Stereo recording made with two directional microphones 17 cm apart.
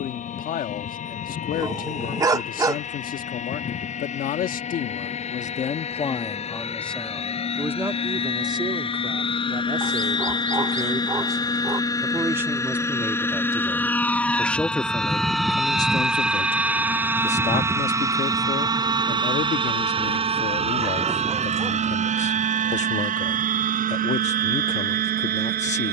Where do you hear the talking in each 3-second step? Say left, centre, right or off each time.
left, left, centre, right, centre, left, left, left, left.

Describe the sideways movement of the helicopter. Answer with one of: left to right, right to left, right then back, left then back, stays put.
left to right.